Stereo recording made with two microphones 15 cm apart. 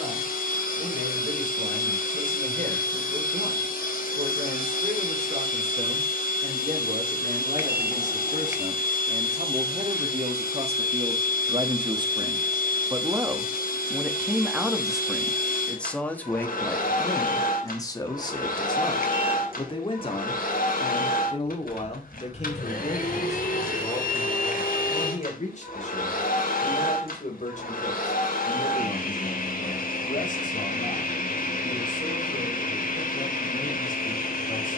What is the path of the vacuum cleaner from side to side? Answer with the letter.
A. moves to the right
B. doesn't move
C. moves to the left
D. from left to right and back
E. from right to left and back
B.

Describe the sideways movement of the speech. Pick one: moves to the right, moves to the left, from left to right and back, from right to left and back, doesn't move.
moves to the left.